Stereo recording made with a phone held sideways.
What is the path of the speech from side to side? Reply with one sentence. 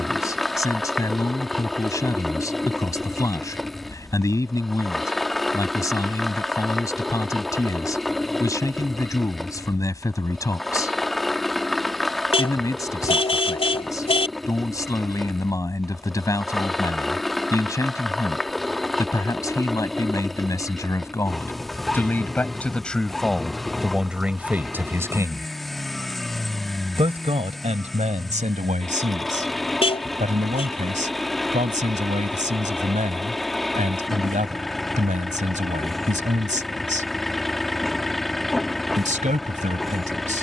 In this clip you hear the speech go from the left side to the right.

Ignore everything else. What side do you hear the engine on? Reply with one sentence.
You can hear the engine in the centre.